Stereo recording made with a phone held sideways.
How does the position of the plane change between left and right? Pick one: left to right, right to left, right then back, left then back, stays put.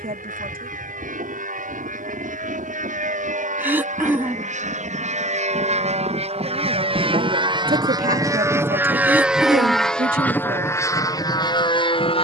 right to left.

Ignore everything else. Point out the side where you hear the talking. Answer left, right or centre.
right.